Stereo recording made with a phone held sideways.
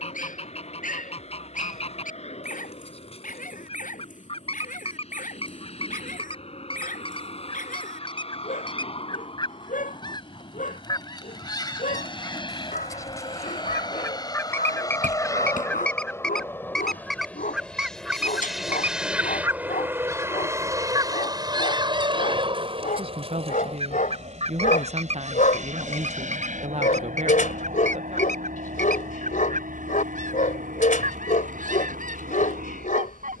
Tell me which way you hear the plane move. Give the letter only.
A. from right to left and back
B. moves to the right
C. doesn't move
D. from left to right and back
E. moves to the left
B.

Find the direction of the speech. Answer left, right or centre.
right.